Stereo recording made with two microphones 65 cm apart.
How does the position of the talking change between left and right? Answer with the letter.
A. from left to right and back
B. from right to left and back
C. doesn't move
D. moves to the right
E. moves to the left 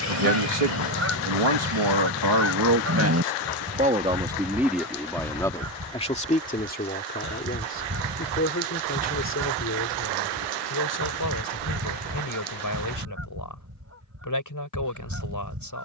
E.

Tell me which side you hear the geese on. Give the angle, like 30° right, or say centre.
20° right.